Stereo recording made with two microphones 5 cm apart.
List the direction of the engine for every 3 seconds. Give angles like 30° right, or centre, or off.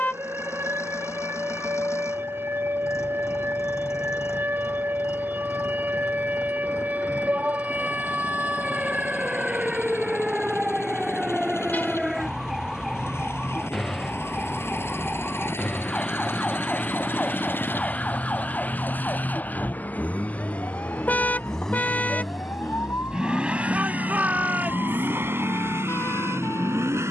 70° left, 70° left, 60° left, 60° left, 60° left, 50° left, 30° left, 10° right, 50° right.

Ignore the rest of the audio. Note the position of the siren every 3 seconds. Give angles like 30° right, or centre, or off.
50° right, 40° right, 30° right, 10° right, centre, 20° left, 30° left, 50° left, 50° left.